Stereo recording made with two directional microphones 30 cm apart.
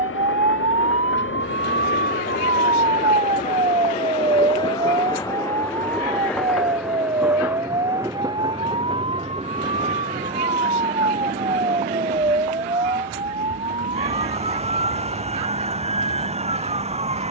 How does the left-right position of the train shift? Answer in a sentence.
In this clip you hear the train move to the right.